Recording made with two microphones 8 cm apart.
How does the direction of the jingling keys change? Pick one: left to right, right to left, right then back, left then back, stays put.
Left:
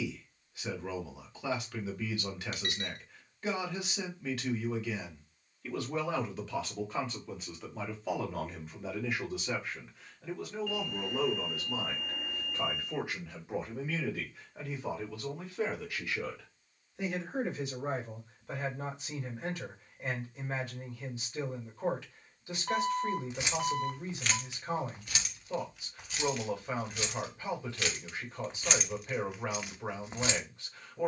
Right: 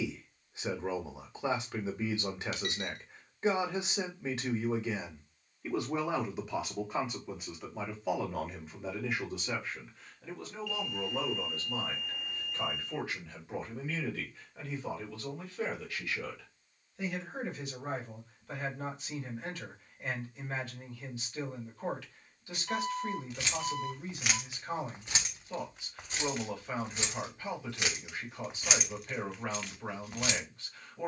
right then back.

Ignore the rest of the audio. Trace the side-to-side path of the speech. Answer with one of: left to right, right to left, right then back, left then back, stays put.
right to left.